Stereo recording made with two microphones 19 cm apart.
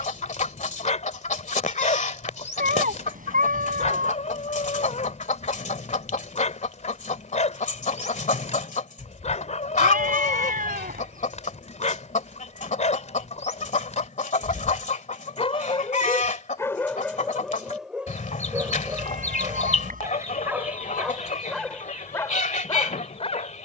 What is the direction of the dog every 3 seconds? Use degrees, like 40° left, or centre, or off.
40° left, 40° left, 40° left, 40° left, 40° left, 10° left, 10° right, 20° left.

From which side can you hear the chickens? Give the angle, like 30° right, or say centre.
40° left.